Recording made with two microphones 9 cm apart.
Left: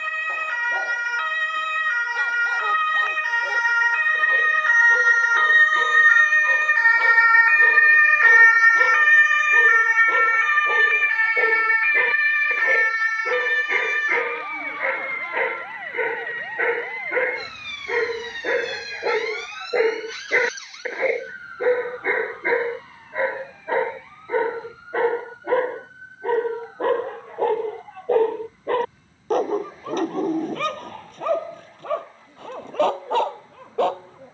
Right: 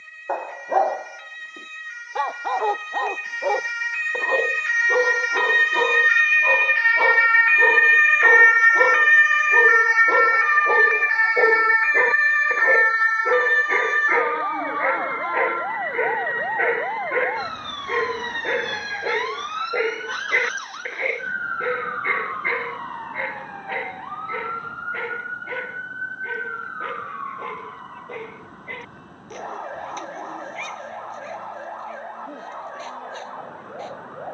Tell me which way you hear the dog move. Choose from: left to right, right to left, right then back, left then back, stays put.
right to left.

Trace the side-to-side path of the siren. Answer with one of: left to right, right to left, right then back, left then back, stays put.
left to right.